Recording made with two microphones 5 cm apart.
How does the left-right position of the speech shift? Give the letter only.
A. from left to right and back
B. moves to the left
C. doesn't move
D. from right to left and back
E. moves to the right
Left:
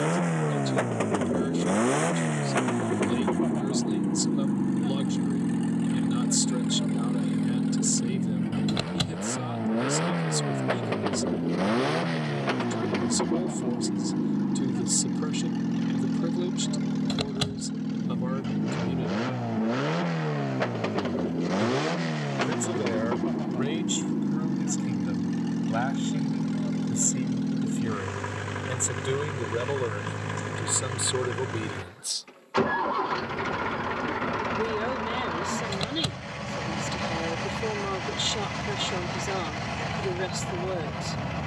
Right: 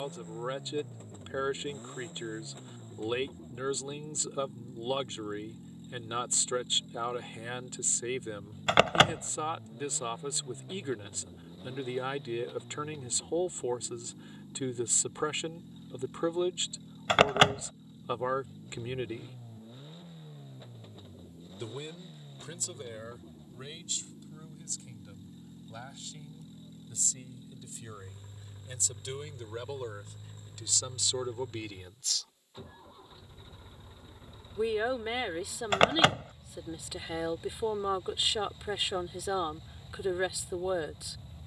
D.